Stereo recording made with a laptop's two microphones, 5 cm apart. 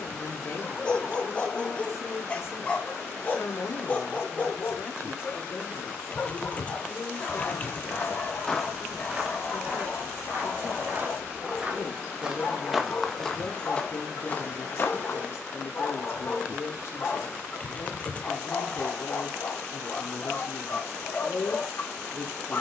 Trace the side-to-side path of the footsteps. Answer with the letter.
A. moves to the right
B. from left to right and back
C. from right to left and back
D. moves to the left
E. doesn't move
B.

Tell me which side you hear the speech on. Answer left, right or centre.
left.